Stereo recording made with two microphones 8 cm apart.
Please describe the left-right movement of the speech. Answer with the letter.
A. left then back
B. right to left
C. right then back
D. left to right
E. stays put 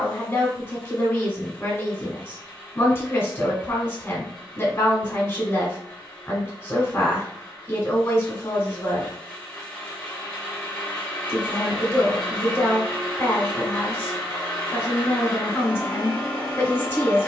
E.